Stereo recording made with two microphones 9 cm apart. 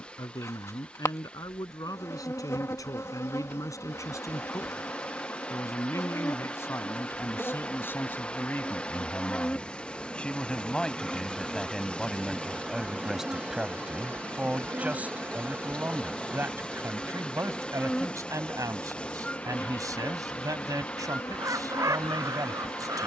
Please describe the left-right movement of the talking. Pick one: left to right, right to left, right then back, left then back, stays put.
left to right.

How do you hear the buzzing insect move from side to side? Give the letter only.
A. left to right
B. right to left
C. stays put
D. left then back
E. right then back
E.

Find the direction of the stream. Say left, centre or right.
centre.